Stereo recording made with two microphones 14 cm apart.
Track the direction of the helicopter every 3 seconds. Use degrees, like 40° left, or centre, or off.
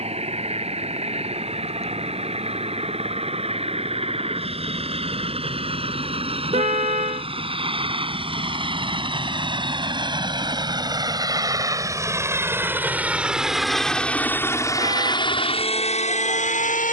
50° right, 50° right, 40° right, 30° right, centre, 50° left.